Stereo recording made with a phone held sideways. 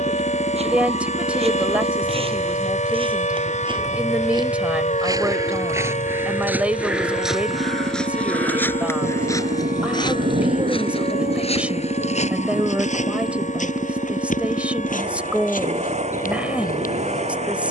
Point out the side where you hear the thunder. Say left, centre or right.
right.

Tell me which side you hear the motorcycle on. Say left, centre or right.
right.